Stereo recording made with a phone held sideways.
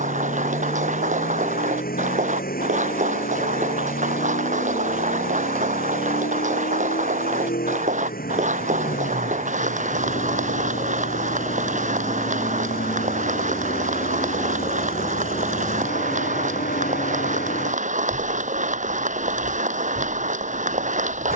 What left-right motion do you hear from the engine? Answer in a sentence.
You can hear the engine stay in one place.